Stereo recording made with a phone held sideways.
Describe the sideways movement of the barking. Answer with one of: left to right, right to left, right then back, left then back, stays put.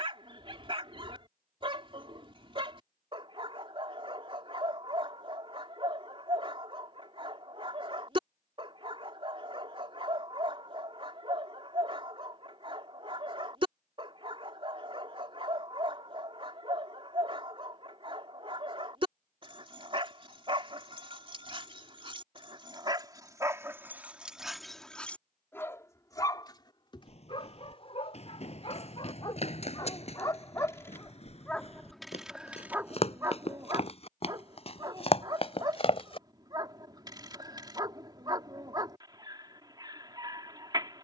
left then back.